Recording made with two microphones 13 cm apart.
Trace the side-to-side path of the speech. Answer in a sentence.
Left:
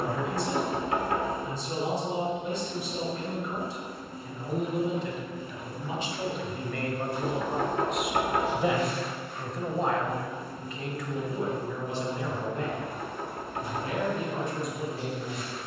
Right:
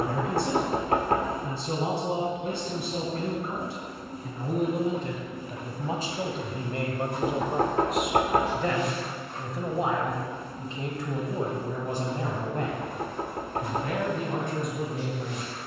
You can hear the speech go left and come back.